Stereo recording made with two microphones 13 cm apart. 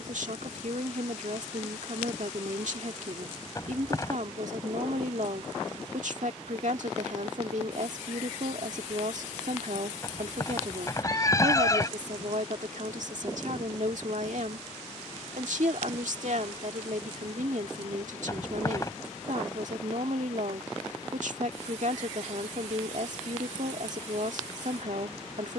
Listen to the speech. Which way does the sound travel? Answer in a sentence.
In this clip you hear the speech stay in one place.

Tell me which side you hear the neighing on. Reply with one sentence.
In this clip you hear the neighing on the left.